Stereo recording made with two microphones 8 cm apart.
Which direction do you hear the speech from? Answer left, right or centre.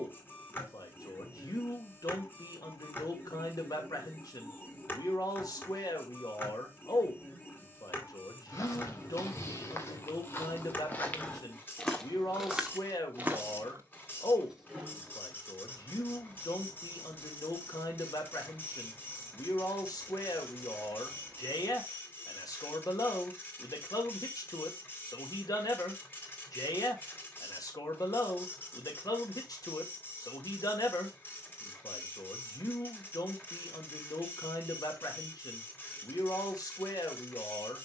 left.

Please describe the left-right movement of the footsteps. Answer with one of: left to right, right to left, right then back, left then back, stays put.
left to right.